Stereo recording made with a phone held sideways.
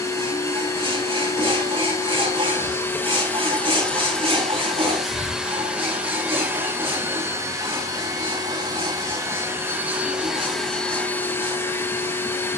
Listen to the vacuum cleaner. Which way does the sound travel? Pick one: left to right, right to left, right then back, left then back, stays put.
right then back.